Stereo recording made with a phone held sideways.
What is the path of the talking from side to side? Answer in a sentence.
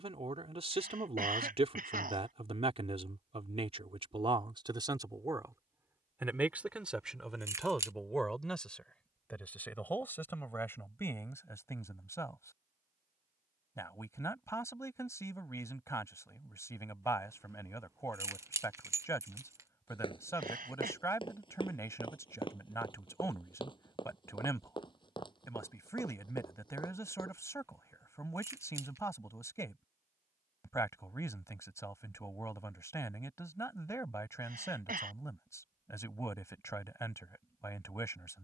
In this clip you hear the talking move from right to left.